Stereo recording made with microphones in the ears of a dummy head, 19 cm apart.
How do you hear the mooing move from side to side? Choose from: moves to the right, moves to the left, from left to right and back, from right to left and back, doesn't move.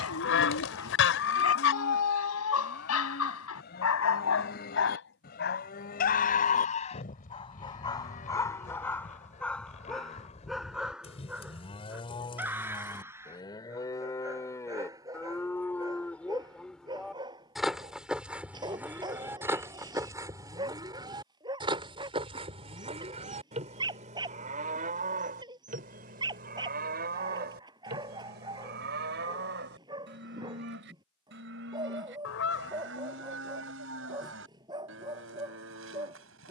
moves to the right.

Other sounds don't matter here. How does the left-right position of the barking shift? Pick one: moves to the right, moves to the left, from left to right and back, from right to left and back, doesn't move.
moves to the right.